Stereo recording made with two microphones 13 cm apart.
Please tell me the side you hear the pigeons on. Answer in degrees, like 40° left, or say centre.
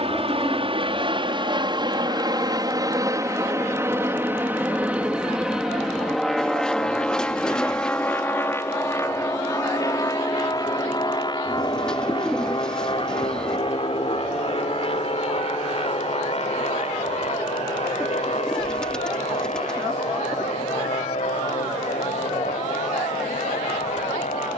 10° left.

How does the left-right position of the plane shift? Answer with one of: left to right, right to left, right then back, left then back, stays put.
right to left.